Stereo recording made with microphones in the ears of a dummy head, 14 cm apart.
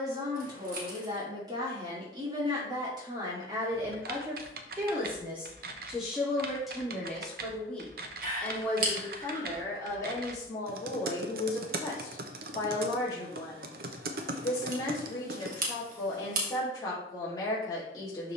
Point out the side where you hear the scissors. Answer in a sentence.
You can hear the scissors on the right.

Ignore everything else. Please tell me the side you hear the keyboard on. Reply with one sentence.
In this clip you hear the keyboard on the right.